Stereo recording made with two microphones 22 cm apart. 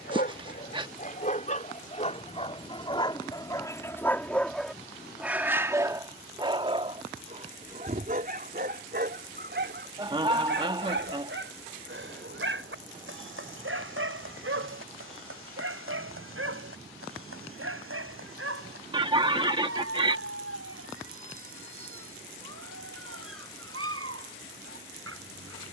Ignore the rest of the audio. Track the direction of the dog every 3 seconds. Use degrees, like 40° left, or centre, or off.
40° left, centre, 30° right, 60° right, 70° right, 80° right, 80° right, 80° right, 80° right.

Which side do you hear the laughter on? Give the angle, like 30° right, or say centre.
20° right.